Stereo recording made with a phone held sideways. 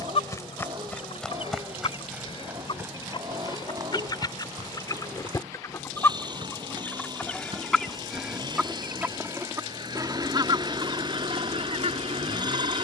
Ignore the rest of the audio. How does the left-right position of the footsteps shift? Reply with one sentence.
You can hear the footsteps move to the right.